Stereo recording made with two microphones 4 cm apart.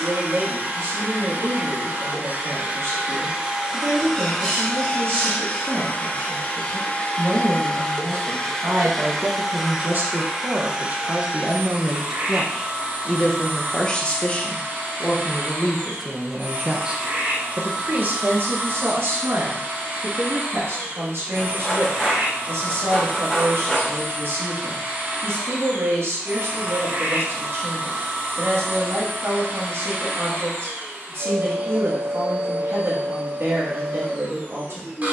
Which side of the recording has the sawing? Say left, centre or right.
centre.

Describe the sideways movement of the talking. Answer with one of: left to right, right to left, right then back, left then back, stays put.
left then back.